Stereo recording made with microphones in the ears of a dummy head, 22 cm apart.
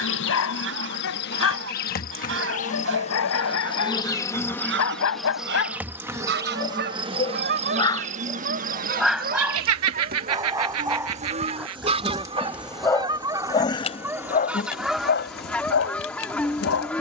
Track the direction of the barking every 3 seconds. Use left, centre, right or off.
left, left, left, centre, left, left.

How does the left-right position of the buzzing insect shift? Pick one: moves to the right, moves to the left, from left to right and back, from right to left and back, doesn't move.
from left to right and back.